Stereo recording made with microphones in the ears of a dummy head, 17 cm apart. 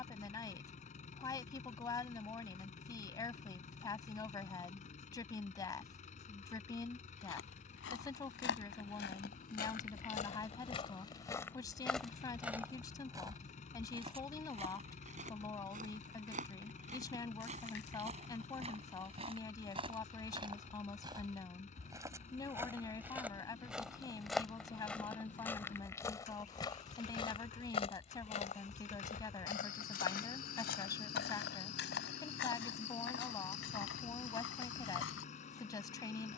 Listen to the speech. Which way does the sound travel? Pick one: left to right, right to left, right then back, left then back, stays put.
stays put.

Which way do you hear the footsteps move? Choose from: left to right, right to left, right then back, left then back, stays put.
right then back.